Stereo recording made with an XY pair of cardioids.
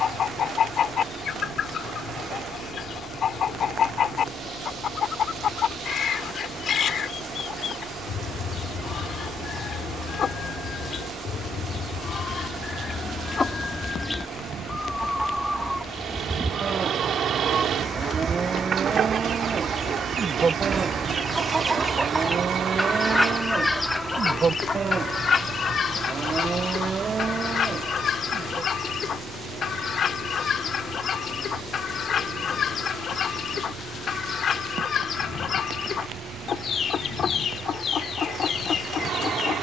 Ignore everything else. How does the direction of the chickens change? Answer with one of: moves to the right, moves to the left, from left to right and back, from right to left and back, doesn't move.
from left to right and back.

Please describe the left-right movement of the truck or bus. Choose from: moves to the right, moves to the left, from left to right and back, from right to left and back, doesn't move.
doesn't move.